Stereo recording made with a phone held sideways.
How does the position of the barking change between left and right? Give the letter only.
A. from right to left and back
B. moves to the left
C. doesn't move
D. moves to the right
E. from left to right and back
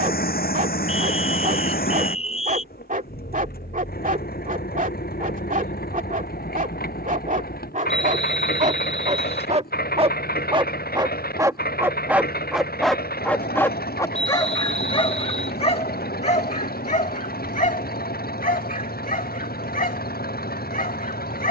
B.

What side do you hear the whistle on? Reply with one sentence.
In this clip you hear the whistle on the left.